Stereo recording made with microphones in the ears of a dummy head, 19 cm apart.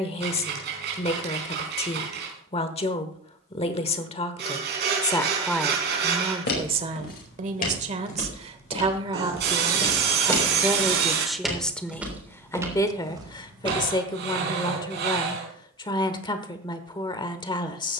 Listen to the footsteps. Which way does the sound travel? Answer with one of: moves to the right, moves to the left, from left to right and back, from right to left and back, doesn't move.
moves to the right.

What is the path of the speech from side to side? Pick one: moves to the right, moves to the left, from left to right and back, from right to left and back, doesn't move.
from left to right and back.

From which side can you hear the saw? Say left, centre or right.
right.